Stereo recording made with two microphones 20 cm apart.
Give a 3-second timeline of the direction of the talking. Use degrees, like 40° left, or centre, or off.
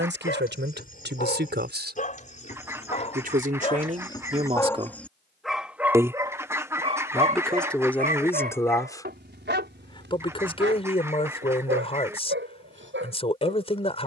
60° right, 40° right, centre, 30° left, 30° left.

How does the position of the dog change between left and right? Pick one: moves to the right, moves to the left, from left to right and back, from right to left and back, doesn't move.
moves to the right.